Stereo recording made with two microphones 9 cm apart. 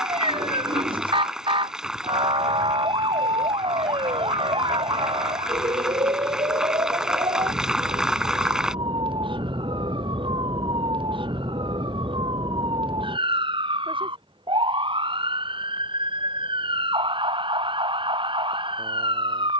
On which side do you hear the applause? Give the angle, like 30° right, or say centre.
10° right.